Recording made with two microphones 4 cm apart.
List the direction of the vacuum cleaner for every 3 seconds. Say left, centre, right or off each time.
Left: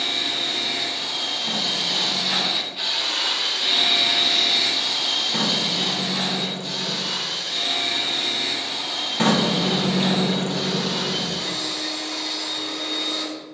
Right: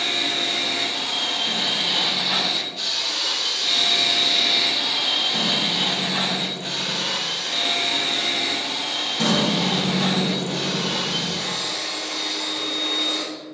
right, centre, right, right, right.